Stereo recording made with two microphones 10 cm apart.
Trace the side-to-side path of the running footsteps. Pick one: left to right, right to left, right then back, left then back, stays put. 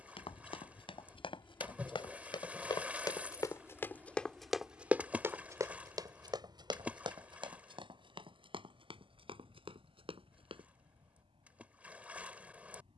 left to right.